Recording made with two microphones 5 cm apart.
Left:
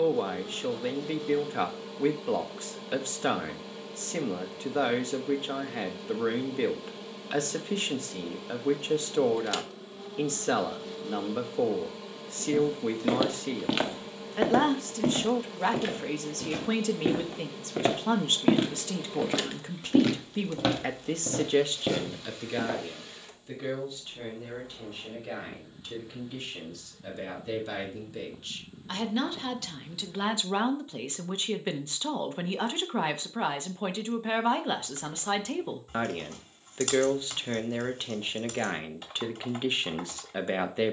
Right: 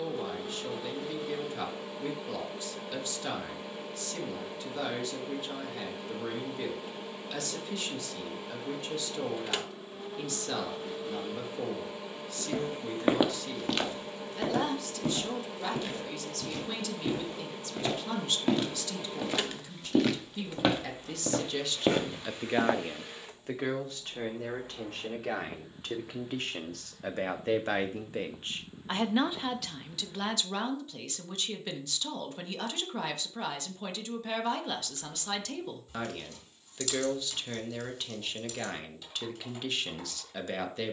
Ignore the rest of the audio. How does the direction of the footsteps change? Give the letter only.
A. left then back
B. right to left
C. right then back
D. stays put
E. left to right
A.